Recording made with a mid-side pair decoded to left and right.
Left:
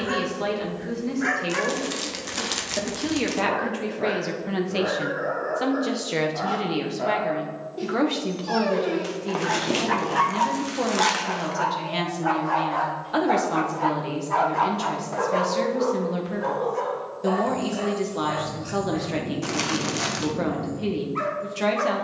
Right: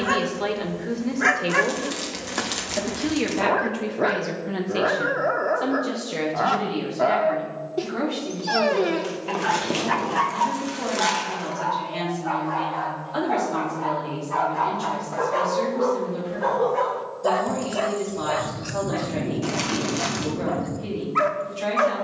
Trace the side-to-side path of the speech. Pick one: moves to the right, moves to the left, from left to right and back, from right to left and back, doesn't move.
moves to the left.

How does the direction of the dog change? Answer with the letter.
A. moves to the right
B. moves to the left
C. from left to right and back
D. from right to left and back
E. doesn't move
D.